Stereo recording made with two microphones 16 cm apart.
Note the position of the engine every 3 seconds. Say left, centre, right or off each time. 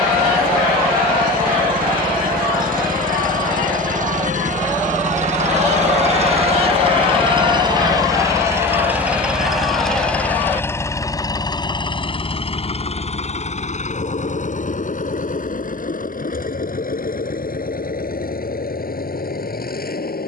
right, right, right, centre, left, left, left.